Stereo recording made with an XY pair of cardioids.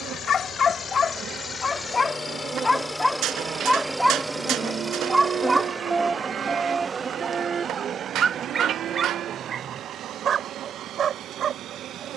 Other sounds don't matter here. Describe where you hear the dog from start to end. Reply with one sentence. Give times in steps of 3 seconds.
In this clip you hear the dog on the left from 0 s, in the centre from 3 s and on the right from 6 s.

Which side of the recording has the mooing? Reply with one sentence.
In this clip you hear the mooing on the right.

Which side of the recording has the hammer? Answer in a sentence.
You can hear the hammer on the right.